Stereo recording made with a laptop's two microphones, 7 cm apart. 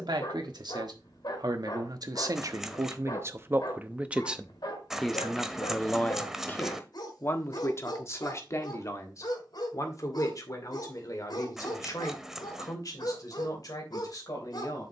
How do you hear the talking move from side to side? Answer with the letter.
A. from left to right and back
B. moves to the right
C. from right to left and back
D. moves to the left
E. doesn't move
D.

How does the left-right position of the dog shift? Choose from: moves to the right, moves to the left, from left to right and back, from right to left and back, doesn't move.
doesn't move.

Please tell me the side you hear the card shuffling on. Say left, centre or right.
centre.